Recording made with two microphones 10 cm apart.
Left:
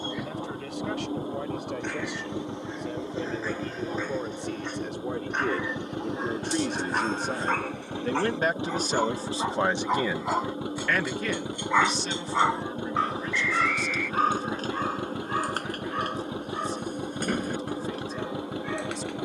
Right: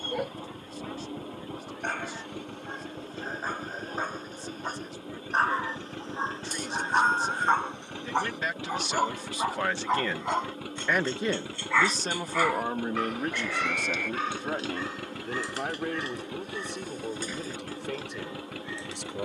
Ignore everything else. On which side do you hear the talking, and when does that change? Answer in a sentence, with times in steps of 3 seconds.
In this clip you hear the talking on the left from 0 s, in the centre from 9 s and on the right from 12 s.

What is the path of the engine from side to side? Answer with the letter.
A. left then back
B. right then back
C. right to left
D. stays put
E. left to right
D.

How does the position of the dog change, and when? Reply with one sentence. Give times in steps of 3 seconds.
You can hear the dog on the right from 0 s, in the centre from 9 s and on the left from 12 s.